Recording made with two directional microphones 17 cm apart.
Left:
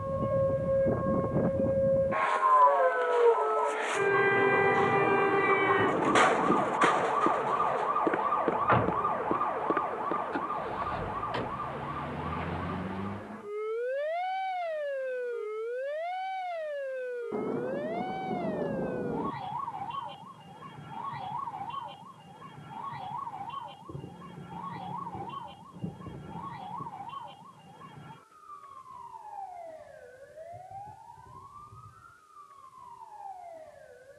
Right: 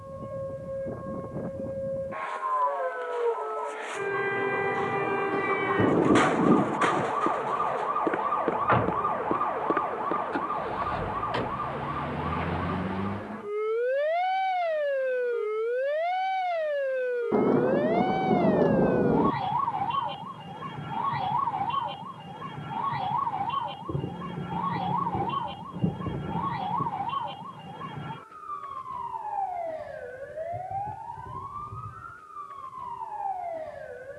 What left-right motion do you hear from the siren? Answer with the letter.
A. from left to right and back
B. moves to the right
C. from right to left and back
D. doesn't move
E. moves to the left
B.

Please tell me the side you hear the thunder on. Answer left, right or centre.
right.